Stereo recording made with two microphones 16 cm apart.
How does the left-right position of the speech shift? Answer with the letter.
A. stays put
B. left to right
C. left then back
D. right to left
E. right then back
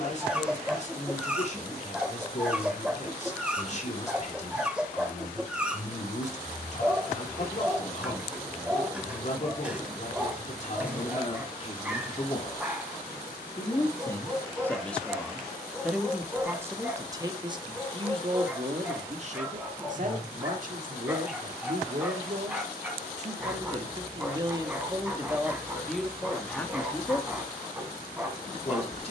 E.